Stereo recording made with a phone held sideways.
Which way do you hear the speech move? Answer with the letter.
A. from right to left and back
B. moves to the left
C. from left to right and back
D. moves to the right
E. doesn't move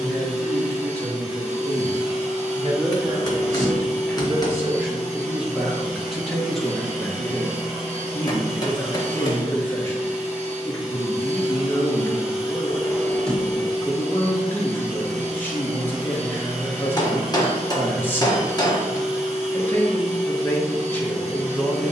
B.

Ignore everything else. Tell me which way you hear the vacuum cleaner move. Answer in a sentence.
In this clip you hear the vacuum cleaner stay put.